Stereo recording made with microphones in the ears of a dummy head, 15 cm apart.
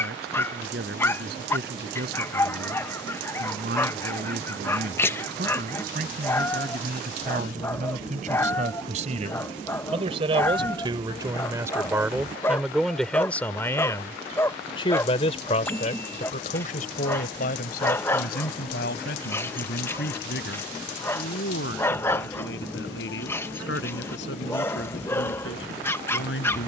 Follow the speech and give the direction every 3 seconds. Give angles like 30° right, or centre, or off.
70° right, 60° right, 50° right, 30° right, 10° left, 50° left, 70° left, 80° left, 80° left.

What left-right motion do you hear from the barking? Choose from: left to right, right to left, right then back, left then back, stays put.
stays put.